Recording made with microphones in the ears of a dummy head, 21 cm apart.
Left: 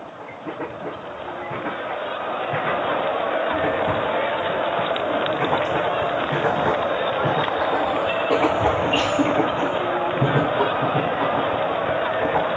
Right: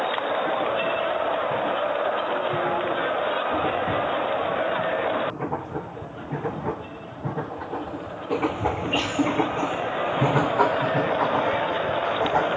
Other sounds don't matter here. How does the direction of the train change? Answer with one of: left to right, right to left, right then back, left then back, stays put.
left to right.